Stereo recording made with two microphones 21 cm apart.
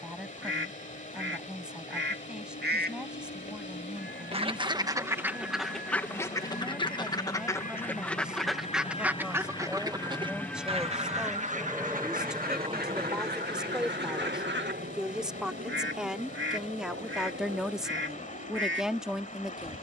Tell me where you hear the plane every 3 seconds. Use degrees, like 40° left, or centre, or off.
70° left, 60° left, 40° left, 10° left, 30° right, 50° right, 60° right.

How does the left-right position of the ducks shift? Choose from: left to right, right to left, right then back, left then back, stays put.
left then back.